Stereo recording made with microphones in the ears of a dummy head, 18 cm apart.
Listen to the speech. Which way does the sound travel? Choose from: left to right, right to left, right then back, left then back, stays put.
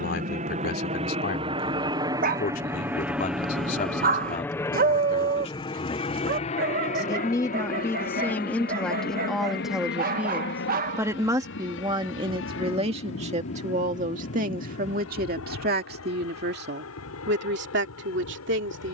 left to right.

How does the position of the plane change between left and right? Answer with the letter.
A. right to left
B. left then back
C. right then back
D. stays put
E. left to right
A.